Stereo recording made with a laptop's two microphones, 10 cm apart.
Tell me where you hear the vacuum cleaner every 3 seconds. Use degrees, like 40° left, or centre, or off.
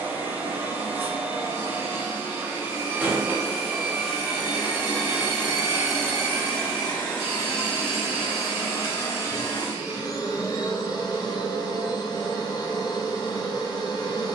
20° right, 10° right, 20° left, 40° left, 50° left.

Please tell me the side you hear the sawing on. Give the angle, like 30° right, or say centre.
30° right.